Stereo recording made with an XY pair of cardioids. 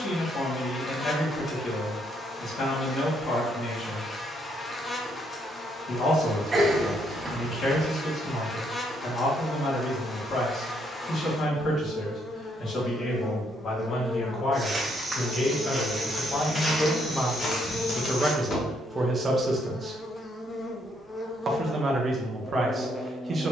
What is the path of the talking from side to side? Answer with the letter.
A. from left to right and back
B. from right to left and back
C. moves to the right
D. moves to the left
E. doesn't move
C.